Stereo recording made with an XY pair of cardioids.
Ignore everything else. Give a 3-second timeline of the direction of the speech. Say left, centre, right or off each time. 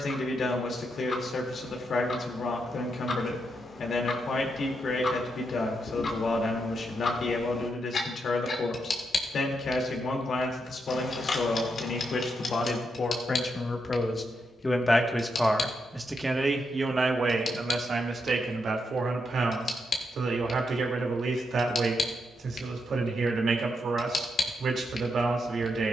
left, left, left, left, left, right, right, right, right.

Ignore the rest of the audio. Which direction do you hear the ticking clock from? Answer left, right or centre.
left.